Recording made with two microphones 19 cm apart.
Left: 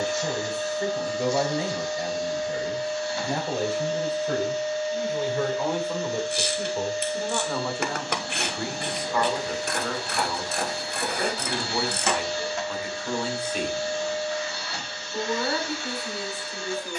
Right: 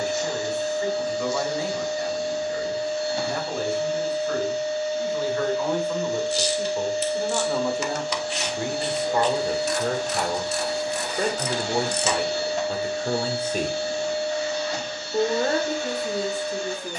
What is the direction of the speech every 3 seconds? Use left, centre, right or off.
left, left, centre, right, right, right.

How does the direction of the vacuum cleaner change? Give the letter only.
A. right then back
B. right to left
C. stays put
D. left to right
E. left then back
C.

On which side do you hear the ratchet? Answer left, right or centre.
left.